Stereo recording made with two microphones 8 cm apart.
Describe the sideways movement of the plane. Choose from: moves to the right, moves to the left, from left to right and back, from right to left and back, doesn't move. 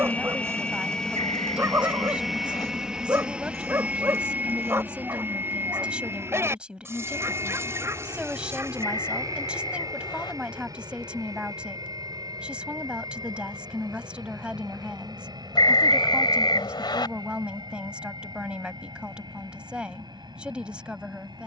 moves to the right.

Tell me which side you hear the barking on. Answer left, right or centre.
right.